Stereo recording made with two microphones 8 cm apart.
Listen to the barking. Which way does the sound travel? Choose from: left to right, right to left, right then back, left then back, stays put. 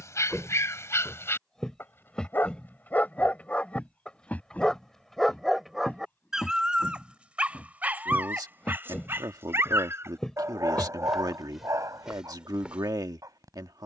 left to right.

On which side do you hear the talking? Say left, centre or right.
right.